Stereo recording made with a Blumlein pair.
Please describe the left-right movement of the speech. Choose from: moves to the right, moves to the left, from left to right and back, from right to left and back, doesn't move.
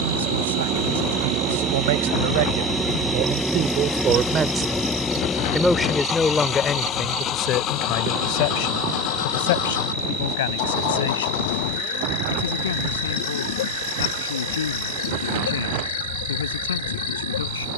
moves to the left.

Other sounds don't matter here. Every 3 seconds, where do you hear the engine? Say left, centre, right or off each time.
right, centre, left, left, left, left.